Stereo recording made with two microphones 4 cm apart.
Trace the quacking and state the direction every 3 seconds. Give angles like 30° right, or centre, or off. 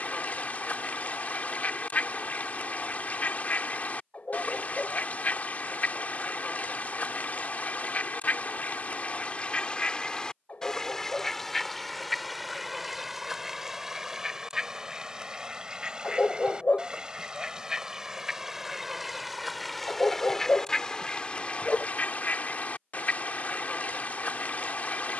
40° left, 40° left, 40° left, 20° left, 10° right, 20° right, centre, 40° left, 40° left.